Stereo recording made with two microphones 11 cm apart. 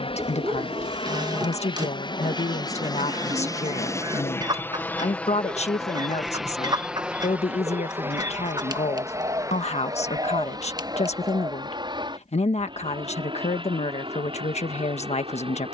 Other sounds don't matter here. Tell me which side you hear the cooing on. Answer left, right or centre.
right.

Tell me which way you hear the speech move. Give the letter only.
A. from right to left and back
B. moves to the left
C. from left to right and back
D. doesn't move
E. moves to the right
D.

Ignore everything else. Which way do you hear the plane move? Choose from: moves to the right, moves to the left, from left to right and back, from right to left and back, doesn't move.
moves to the right.